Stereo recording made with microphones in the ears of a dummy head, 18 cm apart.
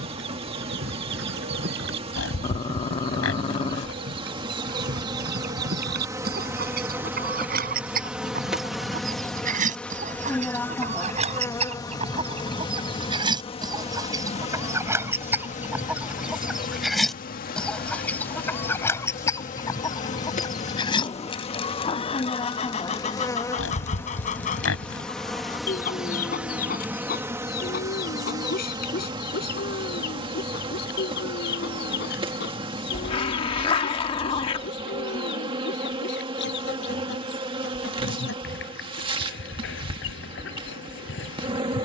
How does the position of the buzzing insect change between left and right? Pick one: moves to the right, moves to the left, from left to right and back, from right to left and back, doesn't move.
from right to left and back.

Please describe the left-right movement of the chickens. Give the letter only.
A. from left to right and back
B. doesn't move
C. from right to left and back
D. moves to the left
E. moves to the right
D.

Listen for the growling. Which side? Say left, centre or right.
left.